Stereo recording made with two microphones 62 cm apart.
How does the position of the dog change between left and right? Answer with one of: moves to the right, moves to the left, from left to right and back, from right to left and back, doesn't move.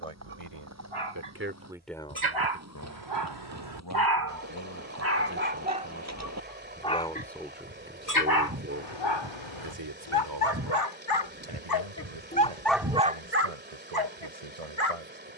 from right to left and back.